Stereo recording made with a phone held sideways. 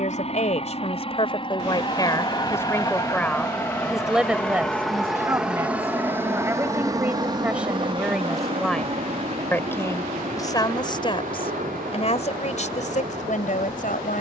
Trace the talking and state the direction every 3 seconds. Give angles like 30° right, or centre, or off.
30° left, 10° right, 10° right, 30° left, 50° left.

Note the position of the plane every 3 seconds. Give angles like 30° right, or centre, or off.
40° left, 10° left, 30° right, 50° right, 60° right.